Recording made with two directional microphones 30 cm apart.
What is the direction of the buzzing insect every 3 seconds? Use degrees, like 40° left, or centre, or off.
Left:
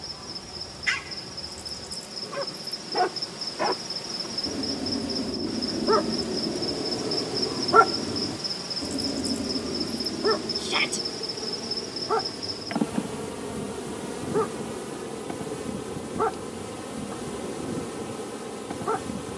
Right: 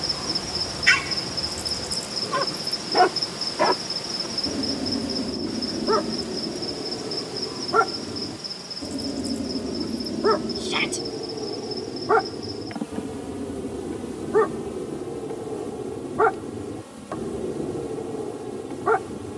40° right, 20° right, 10° left, 20° left, 30° left, 40° left, 40° left.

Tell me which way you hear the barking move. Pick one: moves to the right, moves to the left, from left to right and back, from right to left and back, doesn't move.
from right to left and back.